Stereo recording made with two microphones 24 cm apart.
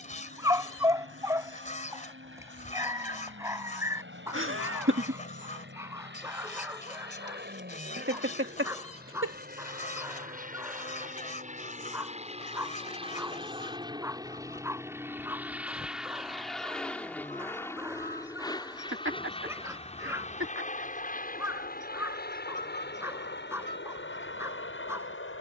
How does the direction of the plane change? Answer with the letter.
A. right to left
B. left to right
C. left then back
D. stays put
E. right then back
A.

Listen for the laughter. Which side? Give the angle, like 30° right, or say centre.
60° right.